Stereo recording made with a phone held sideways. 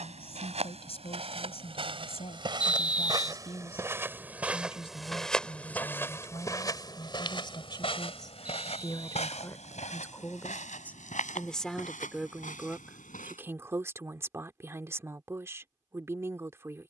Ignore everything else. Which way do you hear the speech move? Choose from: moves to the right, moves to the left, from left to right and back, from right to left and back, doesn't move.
moves to the right.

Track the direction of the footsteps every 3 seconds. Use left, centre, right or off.
right, centre, left, left, left, off.